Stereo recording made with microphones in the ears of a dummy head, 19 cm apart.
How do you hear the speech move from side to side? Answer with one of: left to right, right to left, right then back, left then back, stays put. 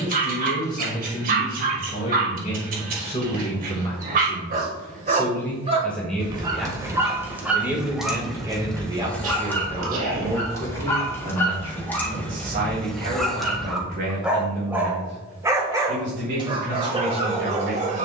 left to right.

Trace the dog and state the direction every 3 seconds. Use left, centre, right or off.
right, right, centre, centre, centre, right.